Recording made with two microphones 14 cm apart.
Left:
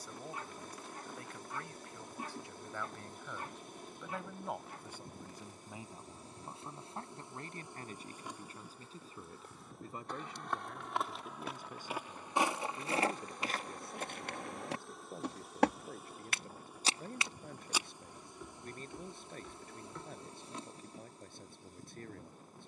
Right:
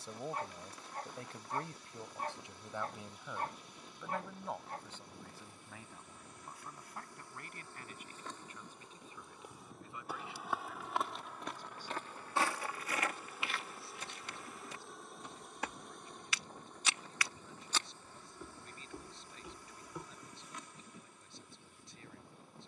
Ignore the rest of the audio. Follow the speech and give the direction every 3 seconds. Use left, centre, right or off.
right, centre, left, left, left, left, left, left.